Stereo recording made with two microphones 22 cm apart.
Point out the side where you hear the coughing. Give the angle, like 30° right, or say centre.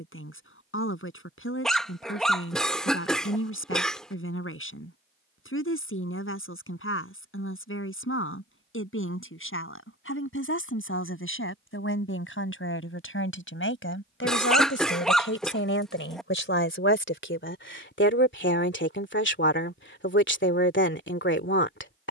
centre.